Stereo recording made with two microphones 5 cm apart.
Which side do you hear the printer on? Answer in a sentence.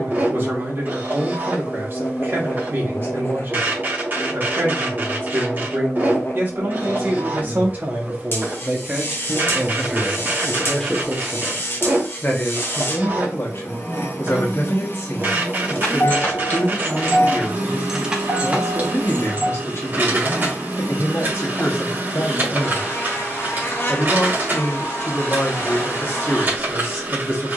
In this clip you hear the printer on the right.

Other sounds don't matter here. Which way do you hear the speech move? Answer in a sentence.
You can hear the speech move from right to left.